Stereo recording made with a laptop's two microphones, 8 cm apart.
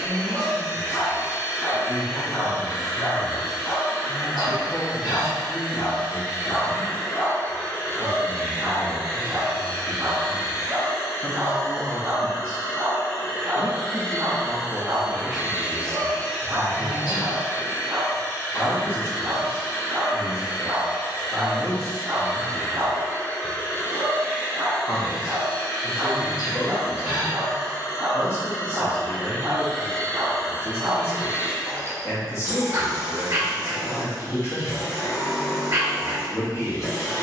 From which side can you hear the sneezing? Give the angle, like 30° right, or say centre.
70° left.